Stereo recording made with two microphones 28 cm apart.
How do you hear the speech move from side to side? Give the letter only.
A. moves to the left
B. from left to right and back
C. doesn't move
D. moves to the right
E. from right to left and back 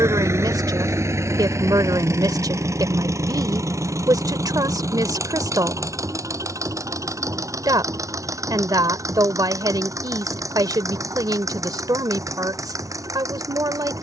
C.